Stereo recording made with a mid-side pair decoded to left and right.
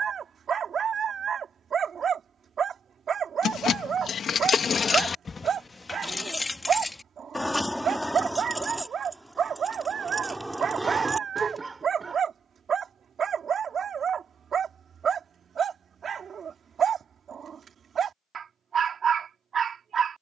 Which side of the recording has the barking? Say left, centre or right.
right.